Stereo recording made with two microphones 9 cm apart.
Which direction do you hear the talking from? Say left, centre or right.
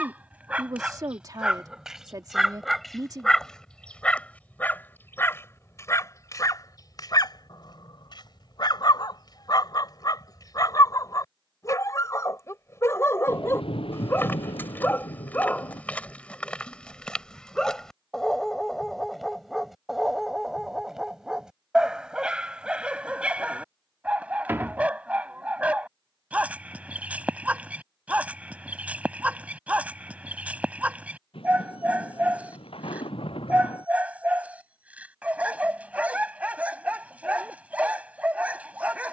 right.